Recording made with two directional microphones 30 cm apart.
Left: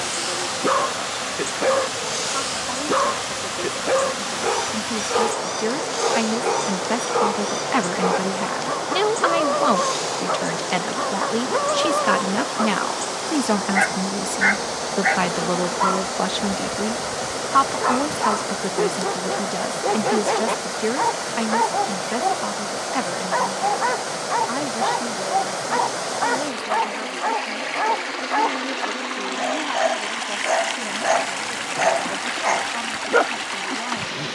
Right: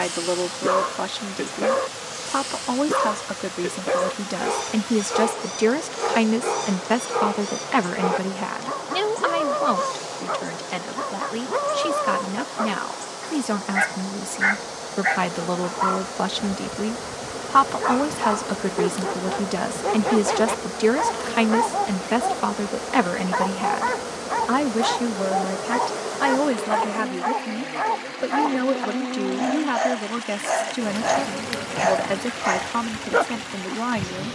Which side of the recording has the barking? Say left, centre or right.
centre.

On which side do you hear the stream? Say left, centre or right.
left.